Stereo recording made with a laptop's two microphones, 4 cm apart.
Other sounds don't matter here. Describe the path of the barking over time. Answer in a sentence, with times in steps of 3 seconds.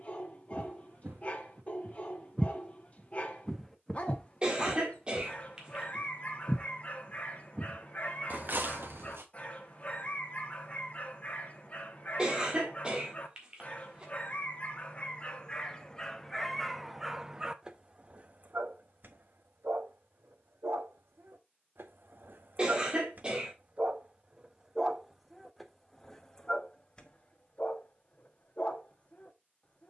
In this clip you hear the barking on the left from 0 s, in the centre from 15 s, on the right from 18 s, in the centre from 24 s and on the left from 27 s.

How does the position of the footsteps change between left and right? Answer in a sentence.
In this clip you hear the footsteps go left and come back.